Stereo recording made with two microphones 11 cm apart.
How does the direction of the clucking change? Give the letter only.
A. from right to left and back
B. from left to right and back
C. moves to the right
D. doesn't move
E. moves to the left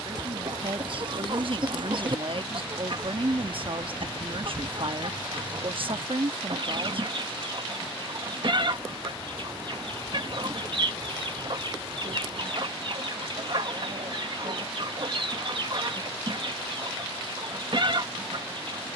D.